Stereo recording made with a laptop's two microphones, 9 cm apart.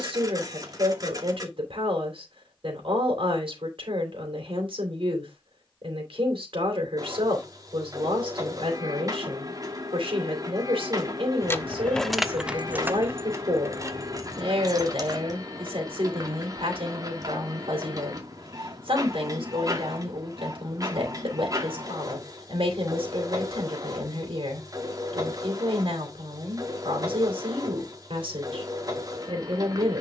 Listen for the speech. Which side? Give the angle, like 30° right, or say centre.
70° right.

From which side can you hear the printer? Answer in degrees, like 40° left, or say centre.
40° right.